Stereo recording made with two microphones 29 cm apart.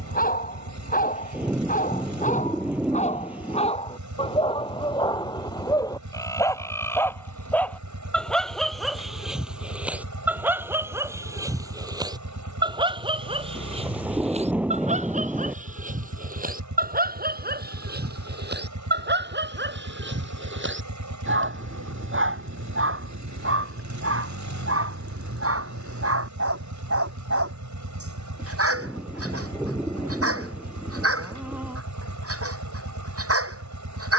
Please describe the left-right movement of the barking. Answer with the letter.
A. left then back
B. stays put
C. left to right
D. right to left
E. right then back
C.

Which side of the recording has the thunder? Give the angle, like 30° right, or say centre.
centre.